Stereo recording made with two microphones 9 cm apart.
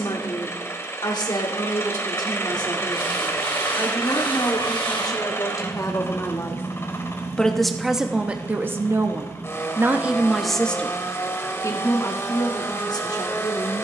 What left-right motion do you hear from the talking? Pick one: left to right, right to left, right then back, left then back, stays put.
right then back.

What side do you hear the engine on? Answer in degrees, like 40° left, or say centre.
30° left.